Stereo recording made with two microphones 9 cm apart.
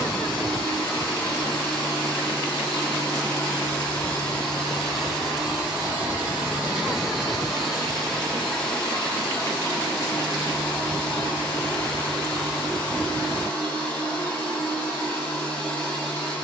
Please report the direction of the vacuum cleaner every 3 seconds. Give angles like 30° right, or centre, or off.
20° left, 10° left, centre, 20° left, 20° left, 20° left.